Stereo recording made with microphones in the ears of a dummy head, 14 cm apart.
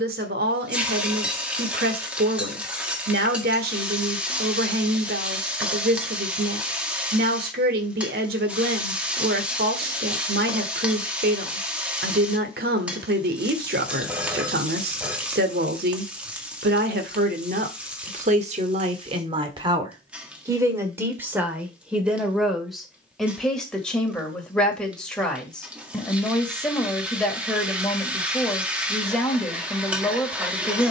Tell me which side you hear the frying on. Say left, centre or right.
centre.